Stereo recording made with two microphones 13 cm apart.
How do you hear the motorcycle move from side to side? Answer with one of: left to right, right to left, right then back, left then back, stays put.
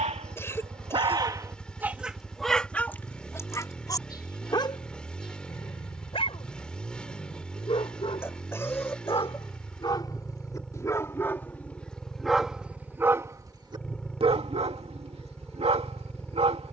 stays put.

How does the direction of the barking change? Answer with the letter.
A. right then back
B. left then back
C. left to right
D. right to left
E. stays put
B.